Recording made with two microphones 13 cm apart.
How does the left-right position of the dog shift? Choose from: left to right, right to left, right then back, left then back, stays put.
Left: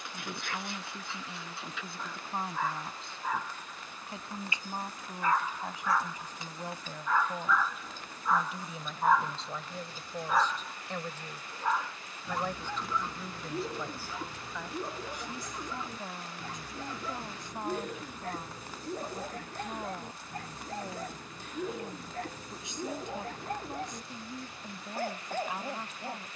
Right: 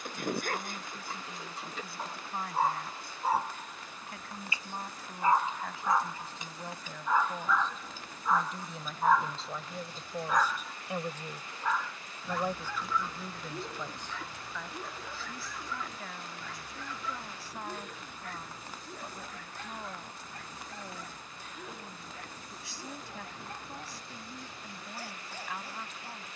right to left.